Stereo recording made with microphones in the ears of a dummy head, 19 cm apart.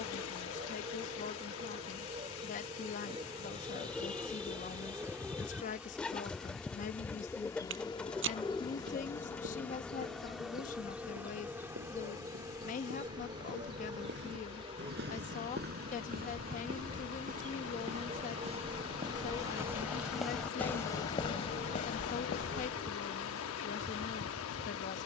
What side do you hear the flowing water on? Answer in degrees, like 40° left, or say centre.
70° left.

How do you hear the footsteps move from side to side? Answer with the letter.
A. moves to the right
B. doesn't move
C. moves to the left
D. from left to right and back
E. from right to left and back
C.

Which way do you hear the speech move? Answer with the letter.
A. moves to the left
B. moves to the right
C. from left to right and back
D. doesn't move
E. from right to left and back
D.